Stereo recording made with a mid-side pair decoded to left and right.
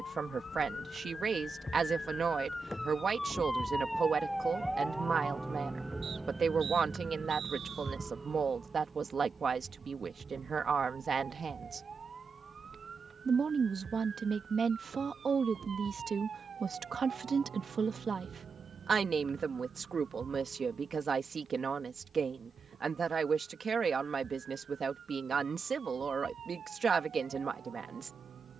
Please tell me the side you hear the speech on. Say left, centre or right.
right.